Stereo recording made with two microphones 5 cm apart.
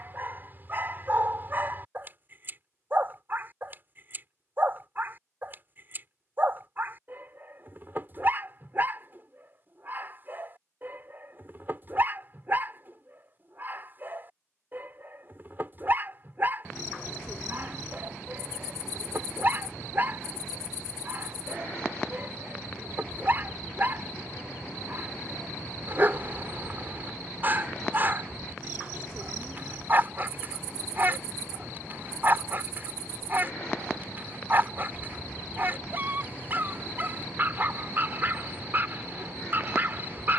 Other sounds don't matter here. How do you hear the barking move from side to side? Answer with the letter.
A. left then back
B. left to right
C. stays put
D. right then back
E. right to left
C.